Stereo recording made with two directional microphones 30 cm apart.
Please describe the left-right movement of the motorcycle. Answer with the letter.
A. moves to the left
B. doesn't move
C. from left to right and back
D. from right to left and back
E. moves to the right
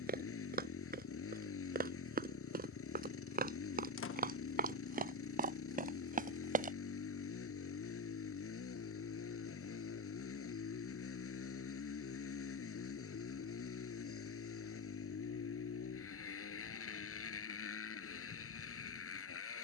B.